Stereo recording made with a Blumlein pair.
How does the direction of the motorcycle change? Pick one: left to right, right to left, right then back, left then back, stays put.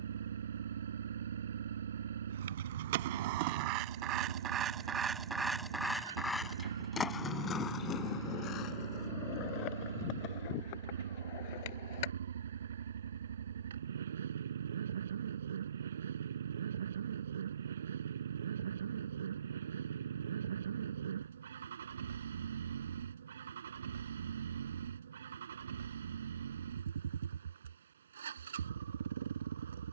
stays put.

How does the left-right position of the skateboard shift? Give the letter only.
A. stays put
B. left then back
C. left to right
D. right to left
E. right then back
D.